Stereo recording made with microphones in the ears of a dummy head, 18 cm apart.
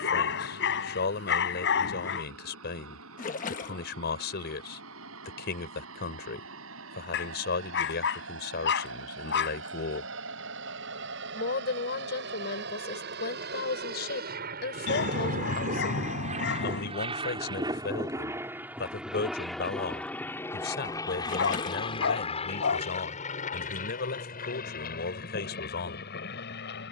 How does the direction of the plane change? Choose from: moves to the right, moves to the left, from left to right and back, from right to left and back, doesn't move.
moves to the left.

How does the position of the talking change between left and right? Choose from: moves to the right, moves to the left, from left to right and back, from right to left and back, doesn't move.
doesn't move.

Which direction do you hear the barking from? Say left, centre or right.
left.